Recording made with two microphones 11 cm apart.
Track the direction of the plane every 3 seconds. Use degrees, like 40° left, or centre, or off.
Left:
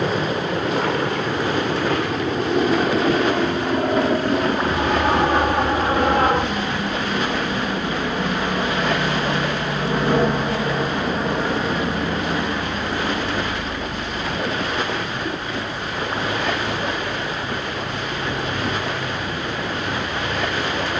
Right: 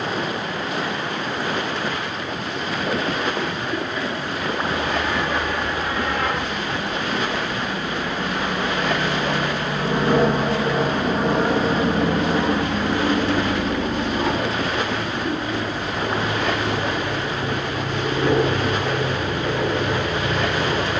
60° left, 50° left, 20° left, 10° right, 30° right, 50° right, 60° right.